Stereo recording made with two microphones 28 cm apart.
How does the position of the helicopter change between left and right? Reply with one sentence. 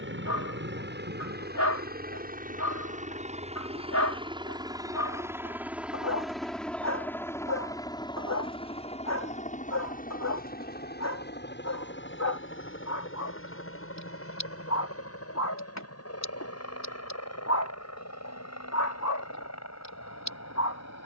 In this clip you hear the helicopter move from right to left.